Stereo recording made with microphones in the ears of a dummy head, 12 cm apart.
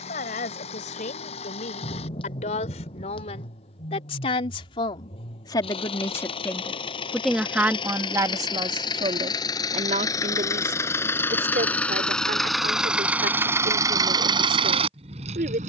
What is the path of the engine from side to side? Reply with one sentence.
You can hear the engine move from left to right.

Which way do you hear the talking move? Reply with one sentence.
In this clip you hear the talking move from left to right.